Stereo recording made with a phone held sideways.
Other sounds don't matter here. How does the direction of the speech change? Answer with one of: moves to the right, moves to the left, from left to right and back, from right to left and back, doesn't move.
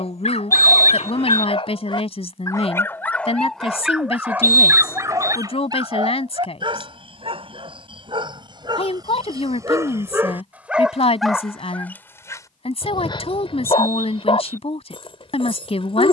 doesn't move.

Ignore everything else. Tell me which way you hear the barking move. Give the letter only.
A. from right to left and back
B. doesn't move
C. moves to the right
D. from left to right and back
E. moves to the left
D.